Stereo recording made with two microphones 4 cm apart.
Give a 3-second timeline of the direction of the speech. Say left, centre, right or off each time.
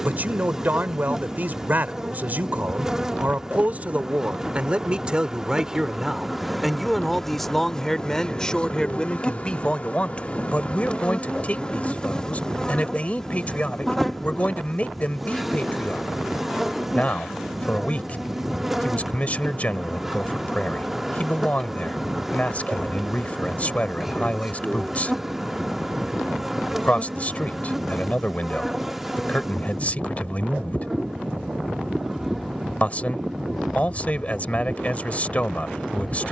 right, right, centre, left, left, left, left, left, left, left, left, left.